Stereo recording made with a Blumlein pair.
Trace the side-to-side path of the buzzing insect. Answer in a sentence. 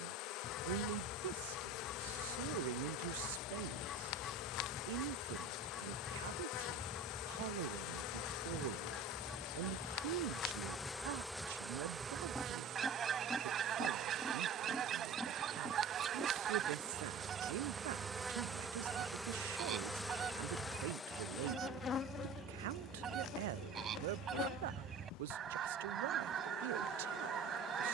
In this clip you hear the buzzing insect move from left to right and back again.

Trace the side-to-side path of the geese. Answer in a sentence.
You can hear the geese move from left to right.